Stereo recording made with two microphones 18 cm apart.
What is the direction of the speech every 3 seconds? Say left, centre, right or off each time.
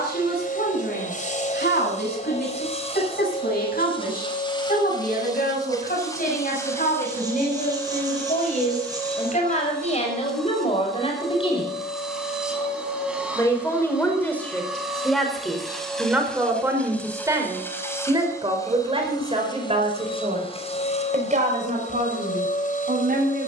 left, left, left, left, centre, centre, right, right.